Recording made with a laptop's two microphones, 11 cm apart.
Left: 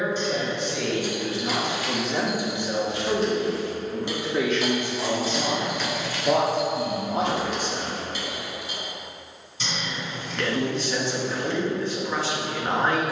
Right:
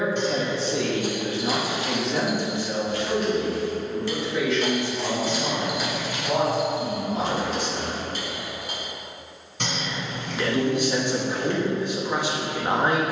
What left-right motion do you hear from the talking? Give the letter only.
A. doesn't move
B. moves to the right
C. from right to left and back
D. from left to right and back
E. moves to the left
C.